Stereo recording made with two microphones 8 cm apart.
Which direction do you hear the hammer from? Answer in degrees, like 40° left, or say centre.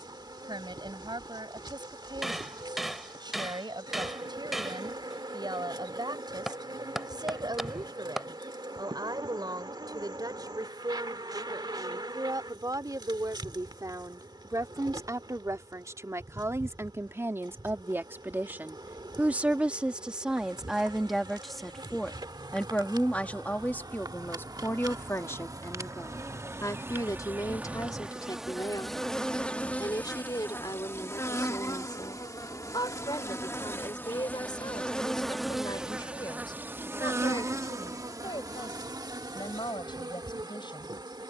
centre.